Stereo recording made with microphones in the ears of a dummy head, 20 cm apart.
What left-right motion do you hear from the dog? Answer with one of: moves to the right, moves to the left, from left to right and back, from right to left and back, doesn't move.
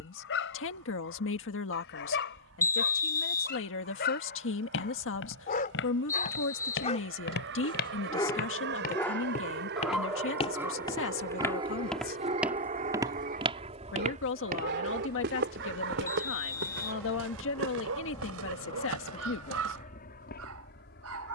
moves to the right.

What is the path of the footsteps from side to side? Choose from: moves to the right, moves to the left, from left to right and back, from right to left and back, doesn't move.
moves to the right.